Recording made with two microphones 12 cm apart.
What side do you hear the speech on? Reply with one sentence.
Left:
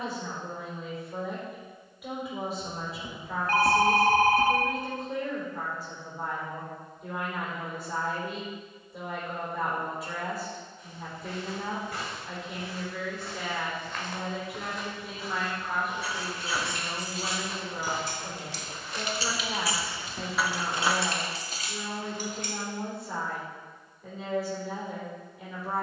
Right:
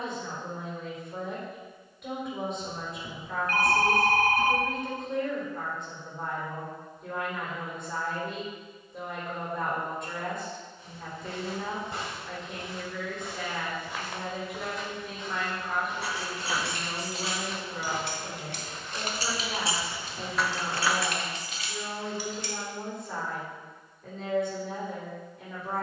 In this clip you hear the speech in the centre.